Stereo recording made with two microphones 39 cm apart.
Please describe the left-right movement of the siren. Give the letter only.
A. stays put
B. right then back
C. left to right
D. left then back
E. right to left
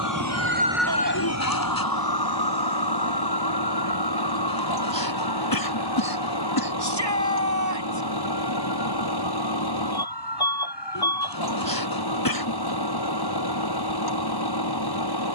E.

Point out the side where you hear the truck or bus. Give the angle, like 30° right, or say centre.
70° left.